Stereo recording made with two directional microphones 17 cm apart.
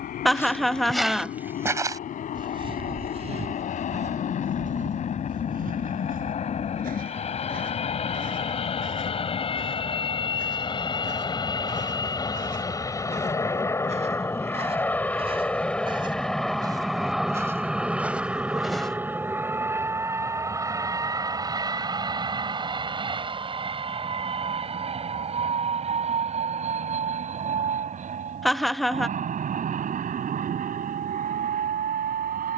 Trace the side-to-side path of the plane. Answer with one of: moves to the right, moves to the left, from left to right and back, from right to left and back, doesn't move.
moves to the right.